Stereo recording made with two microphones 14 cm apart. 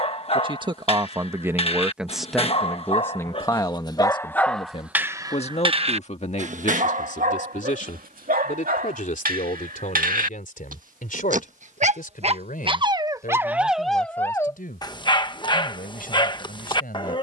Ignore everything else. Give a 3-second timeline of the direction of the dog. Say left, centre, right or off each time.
left, centre, right, right, centre, left.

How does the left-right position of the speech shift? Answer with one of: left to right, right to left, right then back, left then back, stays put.
right to left.